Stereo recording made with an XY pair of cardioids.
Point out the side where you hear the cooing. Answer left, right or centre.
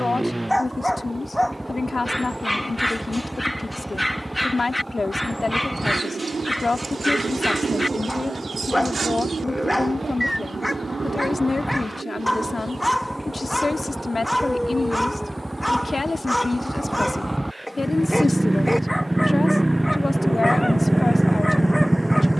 right.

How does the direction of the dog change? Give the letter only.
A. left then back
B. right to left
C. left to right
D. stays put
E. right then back
D.